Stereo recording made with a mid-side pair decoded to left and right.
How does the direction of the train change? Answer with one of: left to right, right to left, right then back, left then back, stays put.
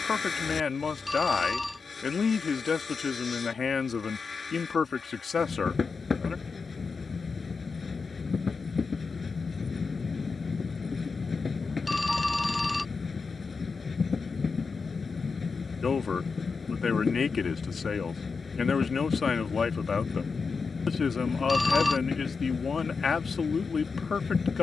stays put.